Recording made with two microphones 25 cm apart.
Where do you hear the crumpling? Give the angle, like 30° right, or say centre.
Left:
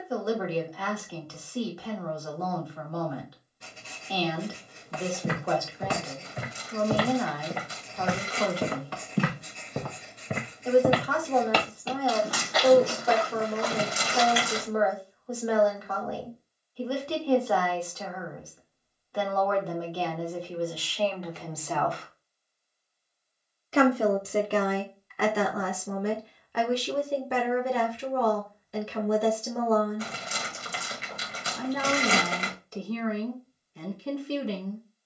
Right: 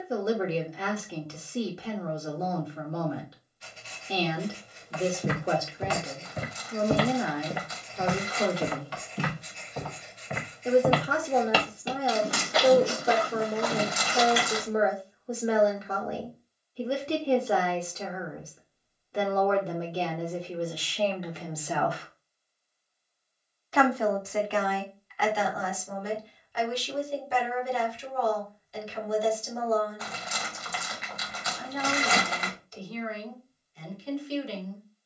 30° left.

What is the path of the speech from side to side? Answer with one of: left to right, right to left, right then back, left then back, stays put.
right to left.